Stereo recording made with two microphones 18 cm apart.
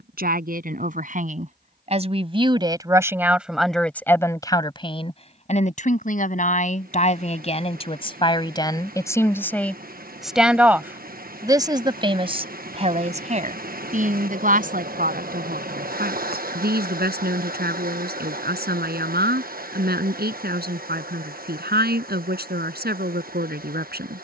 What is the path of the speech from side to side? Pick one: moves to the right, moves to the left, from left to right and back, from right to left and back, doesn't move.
from right to left and back.